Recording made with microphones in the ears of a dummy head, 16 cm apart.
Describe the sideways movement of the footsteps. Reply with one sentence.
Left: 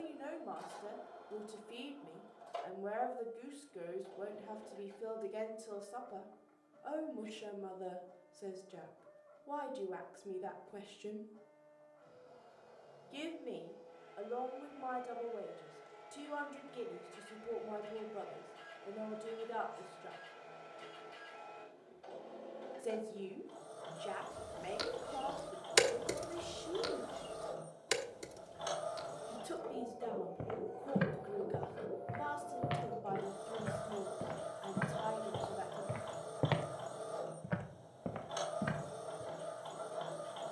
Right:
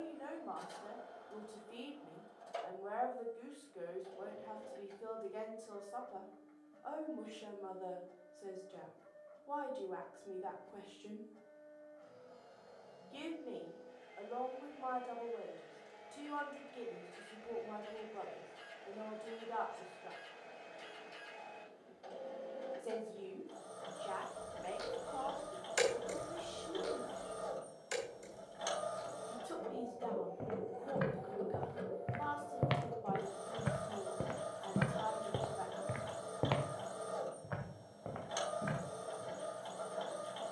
You can hear the footsteps go right and come back.